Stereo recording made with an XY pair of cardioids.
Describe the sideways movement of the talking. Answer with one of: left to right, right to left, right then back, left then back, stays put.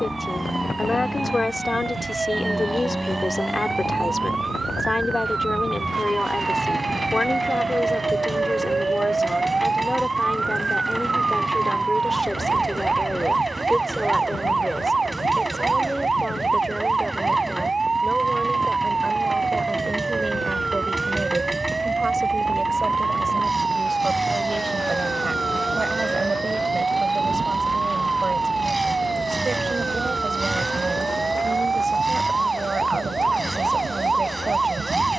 left to right.